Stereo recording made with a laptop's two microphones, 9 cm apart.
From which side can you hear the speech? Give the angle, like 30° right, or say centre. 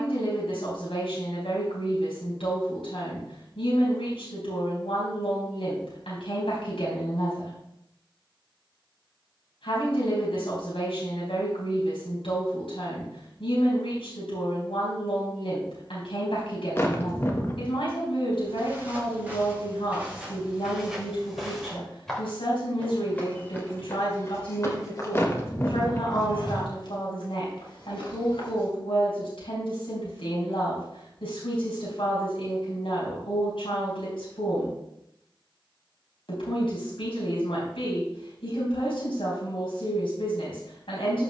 80° left.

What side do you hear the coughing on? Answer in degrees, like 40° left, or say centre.
30° left.